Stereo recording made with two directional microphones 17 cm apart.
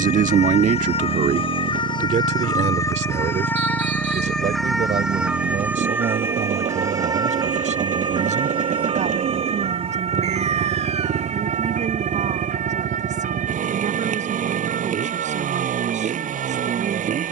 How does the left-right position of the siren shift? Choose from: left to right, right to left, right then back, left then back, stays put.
left to right.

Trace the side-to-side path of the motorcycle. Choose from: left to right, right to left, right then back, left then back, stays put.
stays put.